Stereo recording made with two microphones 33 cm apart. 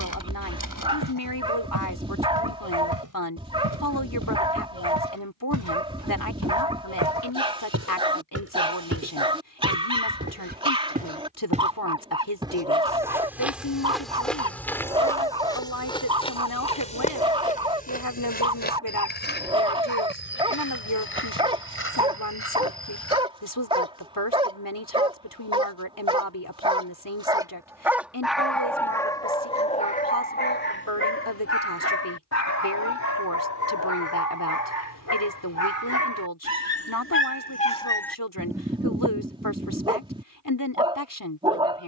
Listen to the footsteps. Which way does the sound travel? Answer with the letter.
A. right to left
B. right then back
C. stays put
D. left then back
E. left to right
A.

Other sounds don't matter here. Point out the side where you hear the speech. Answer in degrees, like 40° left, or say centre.
80° left.